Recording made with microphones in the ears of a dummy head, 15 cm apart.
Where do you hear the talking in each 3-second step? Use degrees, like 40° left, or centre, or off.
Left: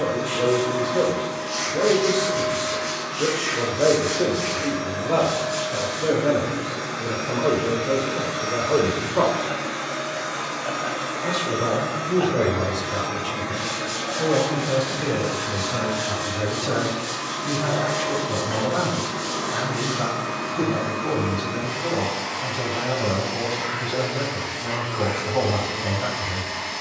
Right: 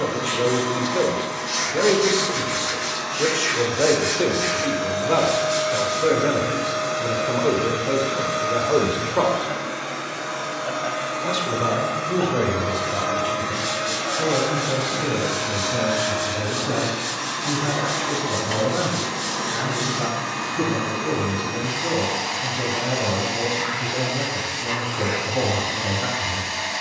60° right, 60° right, 50° right, 20° right, centre, 20° left, 20° left, 20° left, 20° left.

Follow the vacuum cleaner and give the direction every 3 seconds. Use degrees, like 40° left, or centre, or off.
70° right, 60° right, 20° right, centre, 30° right, 60° right, 70° right, 70° right, 70° right.